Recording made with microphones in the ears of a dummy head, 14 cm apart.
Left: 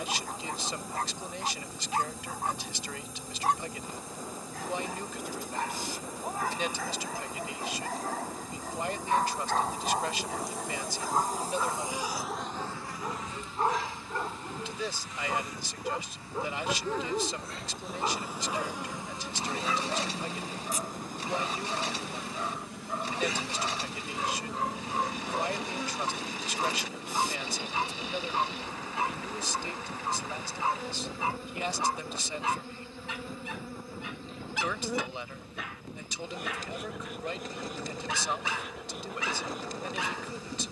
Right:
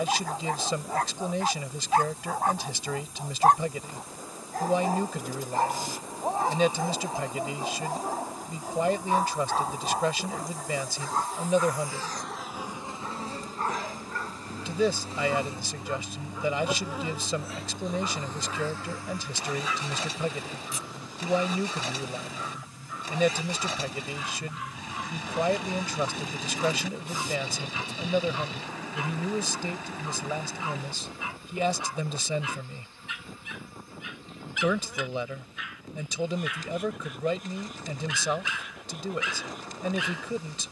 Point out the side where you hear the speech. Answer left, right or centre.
right.